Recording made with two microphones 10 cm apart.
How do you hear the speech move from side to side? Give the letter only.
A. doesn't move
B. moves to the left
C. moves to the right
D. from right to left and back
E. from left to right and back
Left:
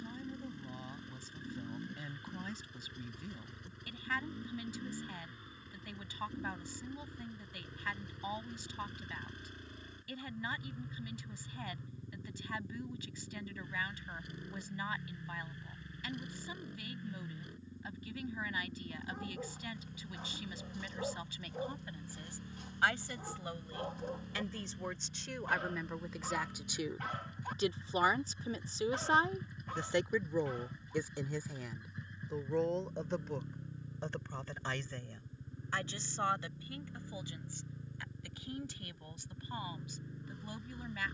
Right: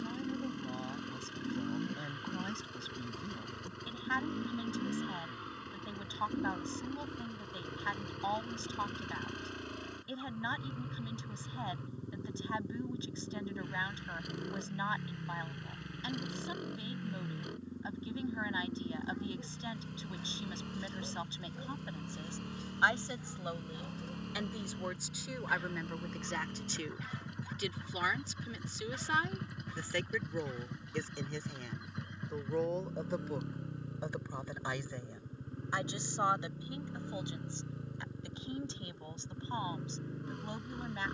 D.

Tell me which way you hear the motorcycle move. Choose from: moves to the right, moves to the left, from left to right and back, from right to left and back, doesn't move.
doesn't move.